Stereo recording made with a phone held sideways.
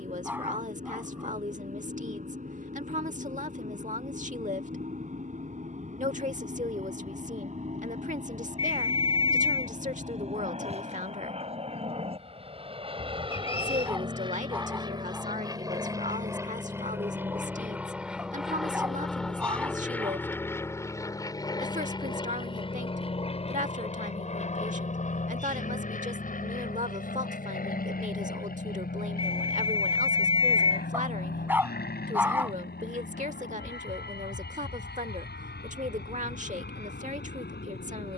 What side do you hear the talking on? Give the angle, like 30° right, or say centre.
50° right.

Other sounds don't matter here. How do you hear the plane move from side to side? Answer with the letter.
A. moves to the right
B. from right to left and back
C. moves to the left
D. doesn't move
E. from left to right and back
C.